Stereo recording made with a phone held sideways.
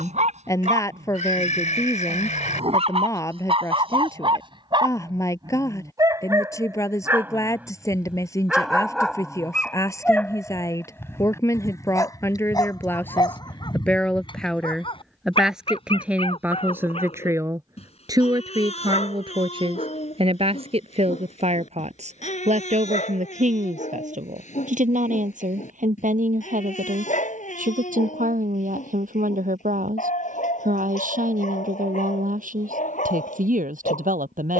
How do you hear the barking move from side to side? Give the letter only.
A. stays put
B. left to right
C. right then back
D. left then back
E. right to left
E.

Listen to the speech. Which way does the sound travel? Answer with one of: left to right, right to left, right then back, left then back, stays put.
left to right.